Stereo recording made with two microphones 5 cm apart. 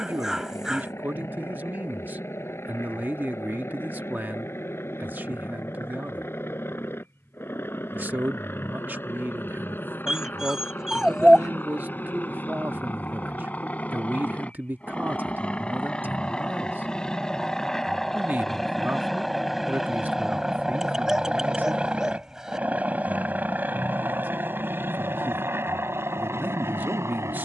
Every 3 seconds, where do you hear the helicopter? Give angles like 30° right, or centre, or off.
50° left, 50° left, 50° left, 40° left, 30° left, 20° left, centre, 20° right, 40° right.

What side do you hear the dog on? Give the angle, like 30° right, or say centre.
10° right.